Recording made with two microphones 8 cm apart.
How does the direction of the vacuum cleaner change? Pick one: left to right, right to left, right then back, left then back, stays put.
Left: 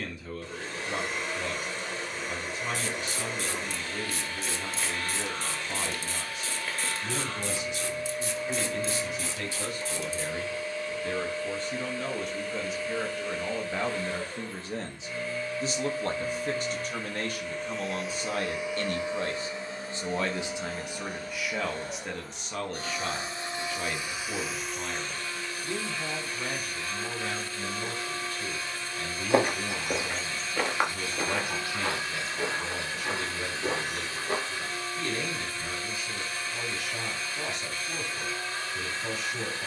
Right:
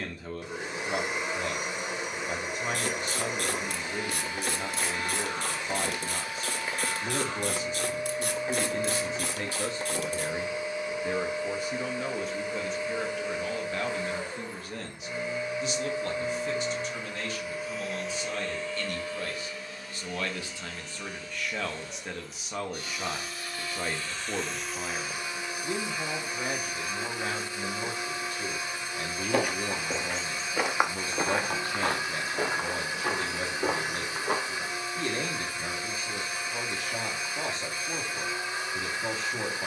left then back.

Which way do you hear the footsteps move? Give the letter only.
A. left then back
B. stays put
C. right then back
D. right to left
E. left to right
E.